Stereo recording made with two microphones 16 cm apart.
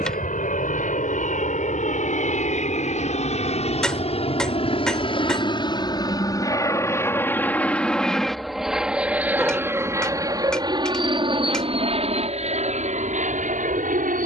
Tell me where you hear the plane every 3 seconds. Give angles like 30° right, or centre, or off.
50° left, 40° left, 10° left, 20° right, 40° right.